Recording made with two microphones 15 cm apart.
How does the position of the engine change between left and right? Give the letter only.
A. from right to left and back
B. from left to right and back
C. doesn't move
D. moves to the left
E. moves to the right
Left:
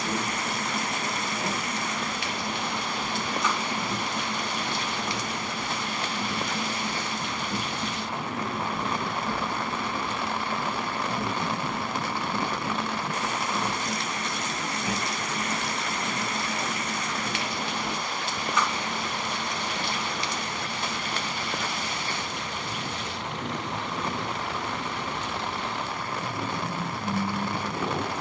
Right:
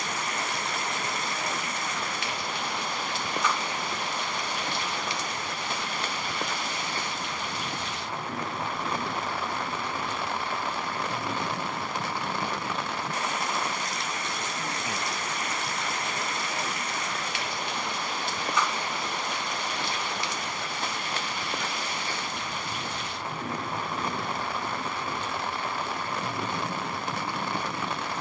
C.